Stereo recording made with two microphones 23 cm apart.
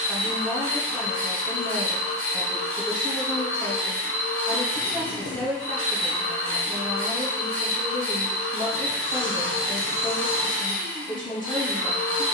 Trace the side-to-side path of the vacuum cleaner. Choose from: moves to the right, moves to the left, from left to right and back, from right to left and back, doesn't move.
doesn't move.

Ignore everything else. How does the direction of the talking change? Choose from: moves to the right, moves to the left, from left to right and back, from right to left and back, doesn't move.
doesn't move.